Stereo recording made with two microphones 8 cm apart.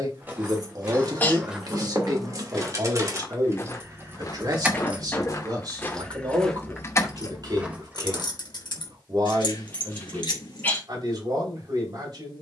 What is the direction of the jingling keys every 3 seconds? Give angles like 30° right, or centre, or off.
50° right, 20° right, 40° left, 80° left.